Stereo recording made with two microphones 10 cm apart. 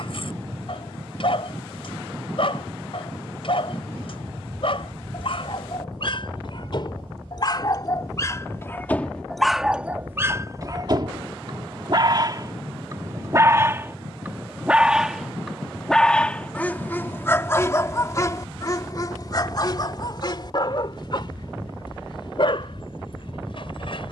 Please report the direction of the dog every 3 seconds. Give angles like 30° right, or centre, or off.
60° left, 60° left, 40° left, 20° right, 30° right, 20° left, 40° left, 60° left.